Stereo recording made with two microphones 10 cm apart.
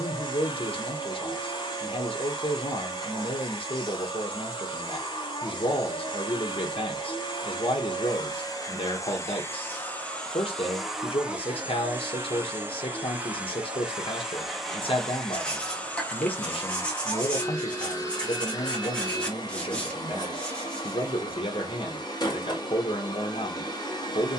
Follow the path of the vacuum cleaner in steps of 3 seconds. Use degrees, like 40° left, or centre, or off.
50° left, 50° left, 50° left, 10° left, 10° right, 20° left, 40° left, 50° left.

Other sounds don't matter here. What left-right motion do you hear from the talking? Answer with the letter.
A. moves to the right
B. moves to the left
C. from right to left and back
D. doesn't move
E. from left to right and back
D.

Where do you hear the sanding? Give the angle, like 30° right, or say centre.
10° left.